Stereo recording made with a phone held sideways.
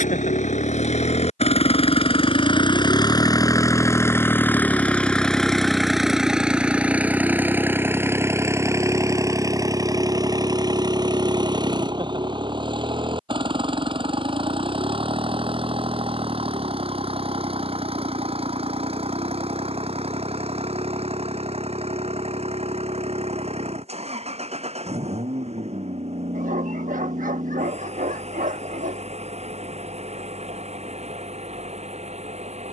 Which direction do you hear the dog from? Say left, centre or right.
right.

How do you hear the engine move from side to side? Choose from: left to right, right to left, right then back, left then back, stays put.
left to right.